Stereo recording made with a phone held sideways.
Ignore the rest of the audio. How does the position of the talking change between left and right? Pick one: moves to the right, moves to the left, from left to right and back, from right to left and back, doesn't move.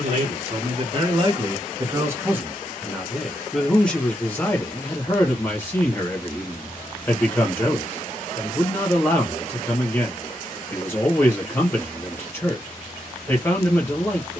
moves to the left.